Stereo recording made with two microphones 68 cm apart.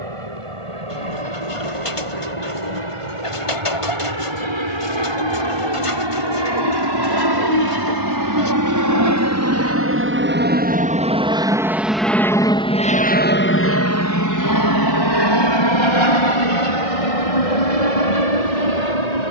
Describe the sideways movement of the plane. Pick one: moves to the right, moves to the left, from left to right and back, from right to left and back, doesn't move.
moves to the left.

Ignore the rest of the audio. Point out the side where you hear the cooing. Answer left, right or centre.
left.